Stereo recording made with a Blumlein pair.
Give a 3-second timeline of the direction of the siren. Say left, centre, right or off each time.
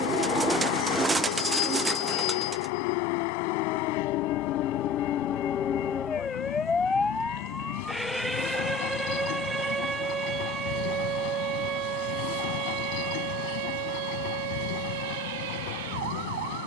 left, left, centre, right, right, right.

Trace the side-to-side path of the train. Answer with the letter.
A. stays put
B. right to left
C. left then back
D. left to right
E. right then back
A.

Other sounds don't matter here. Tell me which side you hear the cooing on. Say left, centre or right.
centre.